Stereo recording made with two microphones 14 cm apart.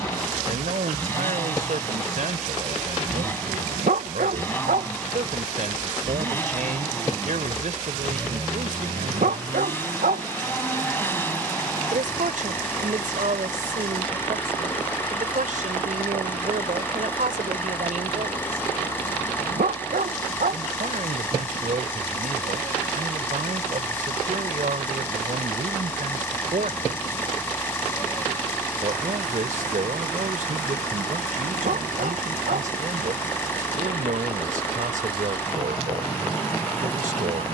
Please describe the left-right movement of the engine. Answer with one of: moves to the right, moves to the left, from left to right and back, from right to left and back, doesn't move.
doesn't move.